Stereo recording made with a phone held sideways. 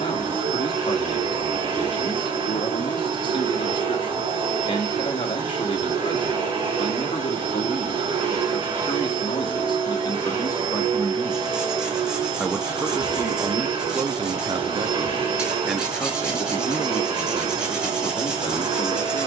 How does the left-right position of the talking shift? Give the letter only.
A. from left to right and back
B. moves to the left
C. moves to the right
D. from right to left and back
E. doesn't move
A.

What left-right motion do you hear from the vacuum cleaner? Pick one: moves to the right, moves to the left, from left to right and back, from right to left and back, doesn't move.
doesn't move.